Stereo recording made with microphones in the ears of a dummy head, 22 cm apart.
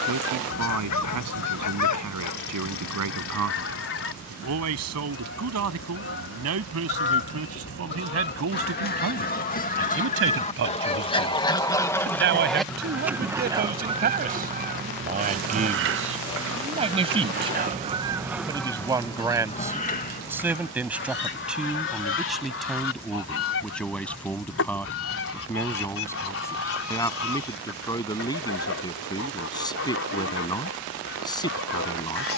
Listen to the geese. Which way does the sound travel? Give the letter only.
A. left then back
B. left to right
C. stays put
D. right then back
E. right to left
D.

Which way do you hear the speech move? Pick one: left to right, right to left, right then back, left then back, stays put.
right to left.